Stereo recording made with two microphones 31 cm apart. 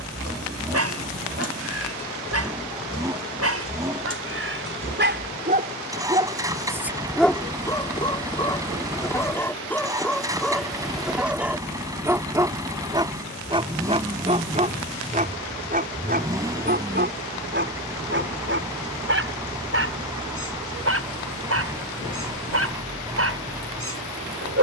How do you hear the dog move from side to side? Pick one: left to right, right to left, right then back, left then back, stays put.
left then back.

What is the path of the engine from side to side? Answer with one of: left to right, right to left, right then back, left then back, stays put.
stays put.